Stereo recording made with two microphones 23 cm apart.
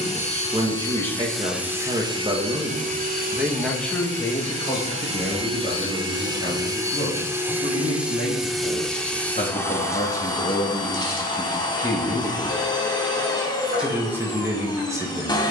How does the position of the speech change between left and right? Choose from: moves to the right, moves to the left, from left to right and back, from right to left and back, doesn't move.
from right to left and back.